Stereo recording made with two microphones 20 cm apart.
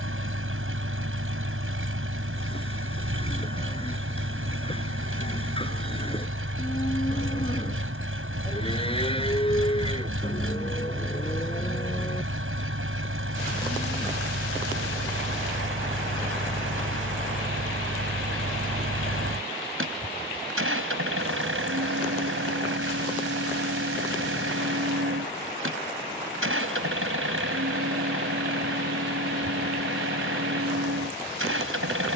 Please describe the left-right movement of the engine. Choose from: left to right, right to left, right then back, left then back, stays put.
stays put.